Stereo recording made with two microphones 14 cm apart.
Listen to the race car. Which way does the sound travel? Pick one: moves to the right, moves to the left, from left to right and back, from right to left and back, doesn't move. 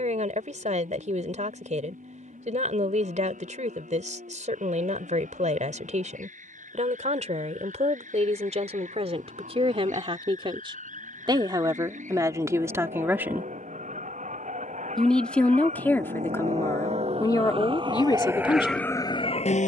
moves to the left.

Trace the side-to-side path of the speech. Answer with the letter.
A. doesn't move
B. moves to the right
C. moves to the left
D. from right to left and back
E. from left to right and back
C.